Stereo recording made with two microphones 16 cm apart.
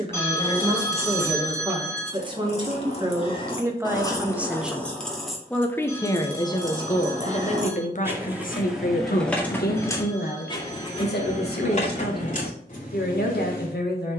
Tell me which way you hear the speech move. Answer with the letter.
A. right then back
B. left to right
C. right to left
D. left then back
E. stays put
C.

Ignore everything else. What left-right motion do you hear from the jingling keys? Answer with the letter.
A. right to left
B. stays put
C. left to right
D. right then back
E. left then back
D.